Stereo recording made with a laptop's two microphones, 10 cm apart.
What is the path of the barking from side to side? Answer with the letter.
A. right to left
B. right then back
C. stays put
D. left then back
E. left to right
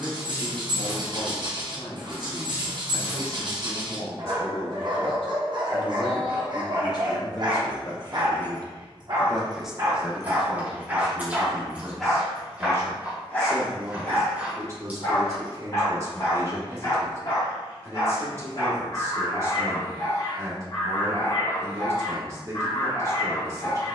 A.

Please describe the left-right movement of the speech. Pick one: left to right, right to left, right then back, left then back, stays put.
left to right.